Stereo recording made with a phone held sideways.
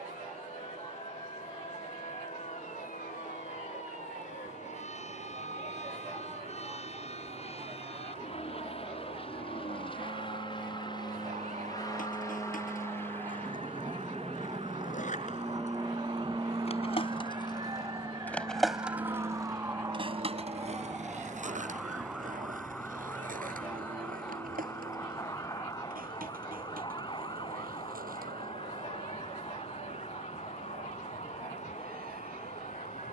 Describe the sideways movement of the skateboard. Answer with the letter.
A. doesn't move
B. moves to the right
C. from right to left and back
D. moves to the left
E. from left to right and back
B.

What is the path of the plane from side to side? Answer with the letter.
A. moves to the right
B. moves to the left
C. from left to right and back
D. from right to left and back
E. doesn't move
A.